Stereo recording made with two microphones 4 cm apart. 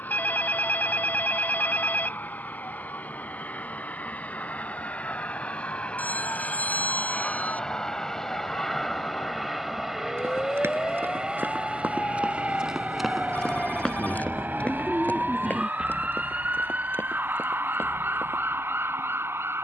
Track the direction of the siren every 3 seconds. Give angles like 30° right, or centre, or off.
60° left, 60° left, 50° left, 40° left, 10° left, 30° right, 50° right.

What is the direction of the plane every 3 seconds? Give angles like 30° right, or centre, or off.
50° left, 40° left, 20° left, 10° right, 30° right, 50° right, 60° right.